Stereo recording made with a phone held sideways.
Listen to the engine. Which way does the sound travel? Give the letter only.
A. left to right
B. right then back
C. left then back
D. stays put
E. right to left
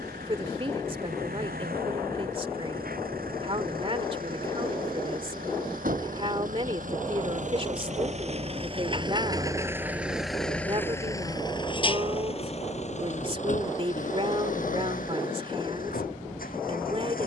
E.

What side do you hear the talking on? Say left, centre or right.
right.